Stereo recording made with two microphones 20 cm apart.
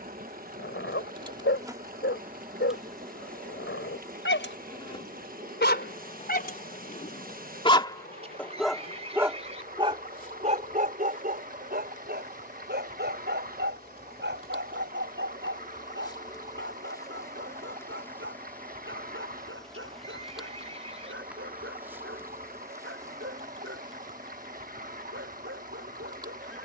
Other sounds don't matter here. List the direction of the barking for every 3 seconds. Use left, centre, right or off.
left, left, left, right, right, right, right, right, right.